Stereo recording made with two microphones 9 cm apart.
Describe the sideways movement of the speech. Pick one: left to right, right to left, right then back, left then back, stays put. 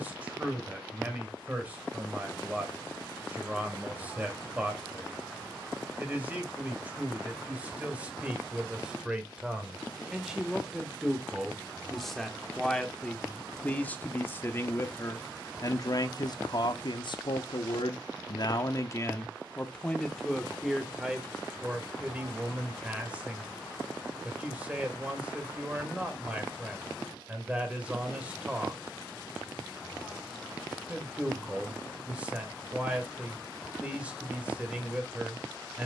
left then back.